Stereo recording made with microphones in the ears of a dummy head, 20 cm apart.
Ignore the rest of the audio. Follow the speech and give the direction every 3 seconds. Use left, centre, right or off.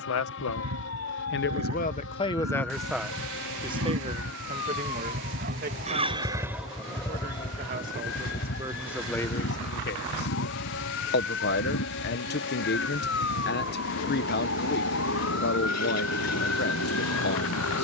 left, right, right, left, left, left.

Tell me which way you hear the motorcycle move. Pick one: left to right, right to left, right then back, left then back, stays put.
right to left.